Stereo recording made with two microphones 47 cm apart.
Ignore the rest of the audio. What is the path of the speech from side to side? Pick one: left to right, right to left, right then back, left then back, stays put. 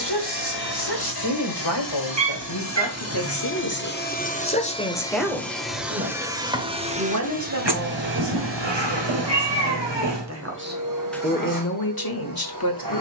right then back.